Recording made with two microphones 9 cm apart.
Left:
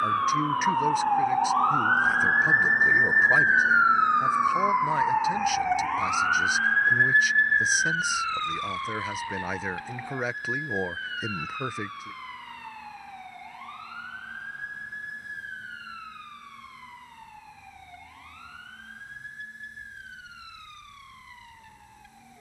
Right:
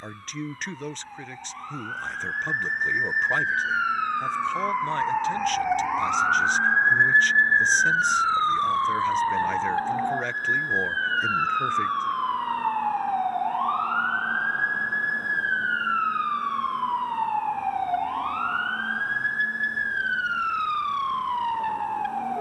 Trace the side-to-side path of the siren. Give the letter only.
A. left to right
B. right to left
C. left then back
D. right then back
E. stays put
A.